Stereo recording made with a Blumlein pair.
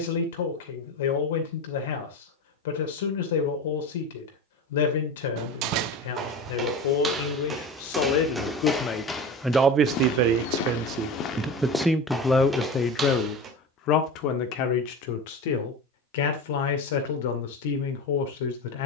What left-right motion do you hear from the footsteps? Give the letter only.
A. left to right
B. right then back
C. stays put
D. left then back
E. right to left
D.